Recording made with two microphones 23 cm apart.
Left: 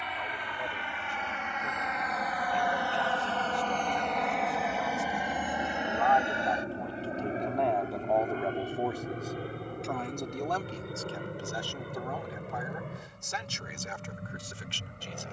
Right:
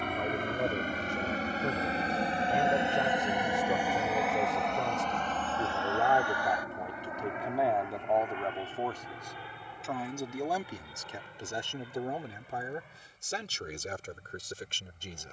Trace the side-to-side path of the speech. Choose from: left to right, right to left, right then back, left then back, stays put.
left then back.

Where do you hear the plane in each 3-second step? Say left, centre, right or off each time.
right, centre, left, left, left.